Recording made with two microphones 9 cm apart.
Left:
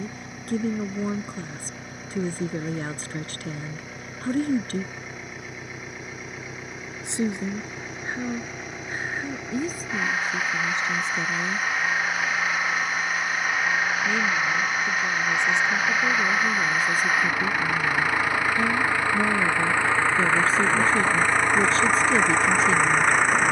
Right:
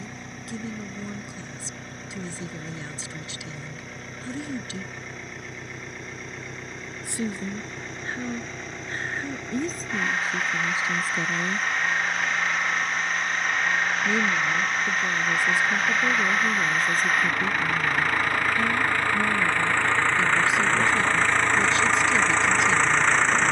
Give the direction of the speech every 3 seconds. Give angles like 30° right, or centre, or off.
40° left, 40° left, 20° left, centre, 10° right, centre, 30° left, 30° left.